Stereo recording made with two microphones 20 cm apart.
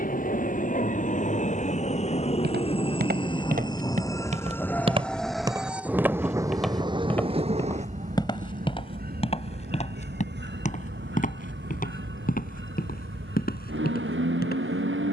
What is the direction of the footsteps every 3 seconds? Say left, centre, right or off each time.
right, right, centre, left, left.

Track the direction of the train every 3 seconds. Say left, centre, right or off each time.
left, centre, right, right, right.